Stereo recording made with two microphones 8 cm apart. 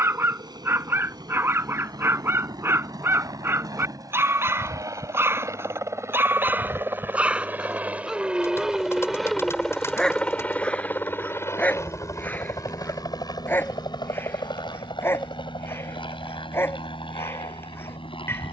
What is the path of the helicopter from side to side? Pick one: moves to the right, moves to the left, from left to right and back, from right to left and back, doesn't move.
moves to the left.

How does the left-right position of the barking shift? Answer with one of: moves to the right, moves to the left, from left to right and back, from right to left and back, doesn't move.
moves to the left.